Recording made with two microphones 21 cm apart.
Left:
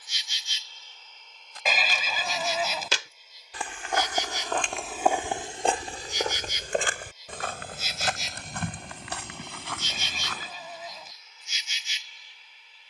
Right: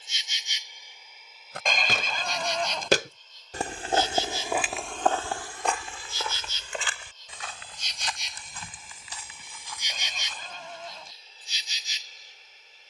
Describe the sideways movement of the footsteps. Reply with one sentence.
You can hear the footsteps go from the right side to the left.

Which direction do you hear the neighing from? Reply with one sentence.
You can hear the neighing in the centre.